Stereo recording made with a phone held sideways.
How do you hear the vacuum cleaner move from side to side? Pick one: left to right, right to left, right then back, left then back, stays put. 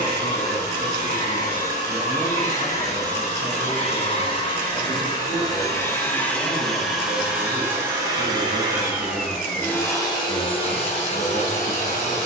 right then back.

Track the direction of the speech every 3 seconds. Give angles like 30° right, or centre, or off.
10° right, 20° left, 10° left, 10° right.